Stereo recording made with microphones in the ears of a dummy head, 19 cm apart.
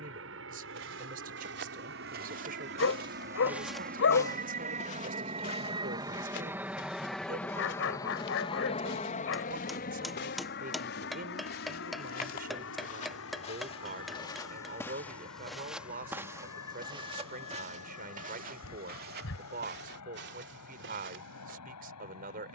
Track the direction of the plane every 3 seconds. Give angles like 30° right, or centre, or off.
60° right, 40° right, 10° left, 40° left, 60° left, 70° left, 70° left, 80° left.